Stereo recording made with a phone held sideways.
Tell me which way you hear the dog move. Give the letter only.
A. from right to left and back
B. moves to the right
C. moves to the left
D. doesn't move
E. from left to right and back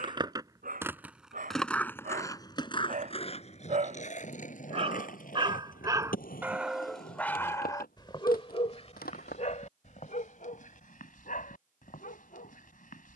C.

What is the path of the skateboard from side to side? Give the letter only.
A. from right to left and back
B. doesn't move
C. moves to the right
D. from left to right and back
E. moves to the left
E.